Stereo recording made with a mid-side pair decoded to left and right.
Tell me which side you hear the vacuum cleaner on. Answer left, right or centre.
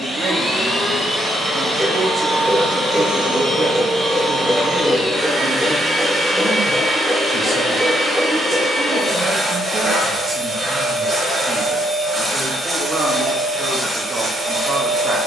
right.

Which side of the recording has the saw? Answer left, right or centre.
centre.